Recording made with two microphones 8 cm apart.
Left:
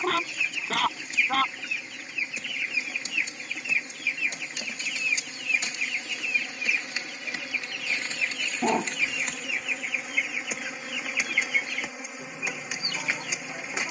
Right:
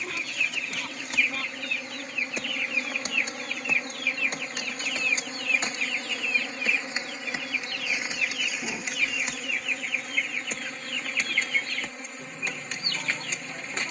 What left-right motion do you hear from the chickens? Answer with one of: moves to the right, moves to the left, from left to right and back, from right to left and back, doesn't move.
doesn't move.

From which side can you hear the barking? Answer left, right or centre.
left.